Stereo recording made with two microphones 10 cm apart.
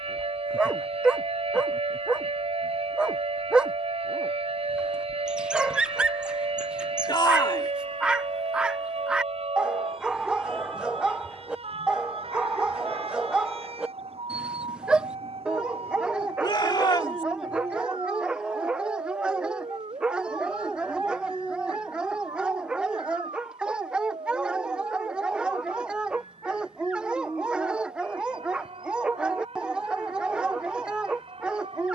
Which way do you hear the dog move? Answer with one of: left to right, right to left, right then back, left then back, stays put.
stays put.